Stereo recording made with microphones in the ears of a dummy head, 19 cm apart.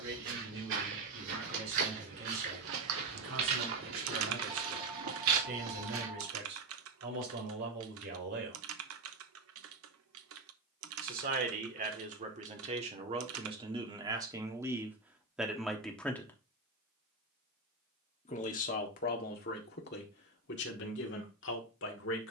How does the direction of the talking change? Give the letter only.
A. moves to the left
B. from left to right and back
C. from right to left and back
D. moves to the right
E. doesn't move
A.